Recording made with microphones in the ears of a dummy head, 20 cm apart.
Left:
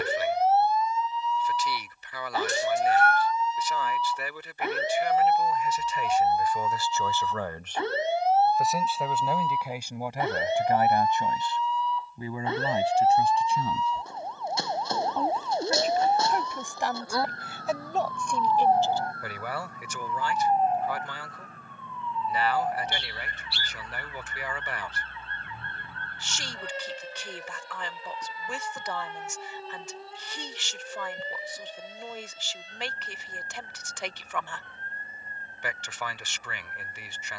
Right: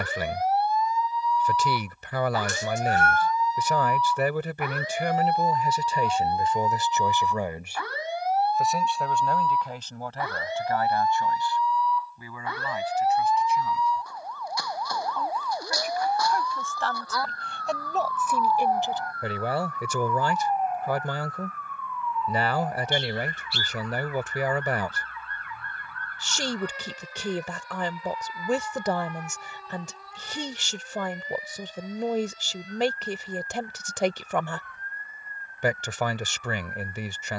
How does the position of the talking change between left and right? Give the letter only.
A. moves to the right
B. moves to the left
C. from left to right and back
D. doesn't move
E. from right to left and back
E.